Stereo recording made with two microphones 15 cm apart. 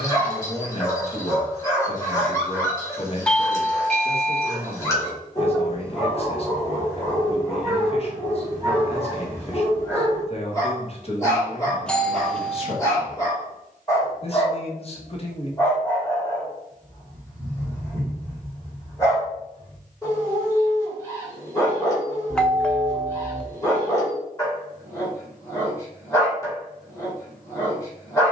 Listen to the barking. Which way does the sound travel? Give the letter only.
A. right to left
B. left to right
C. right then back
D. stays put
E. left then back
D.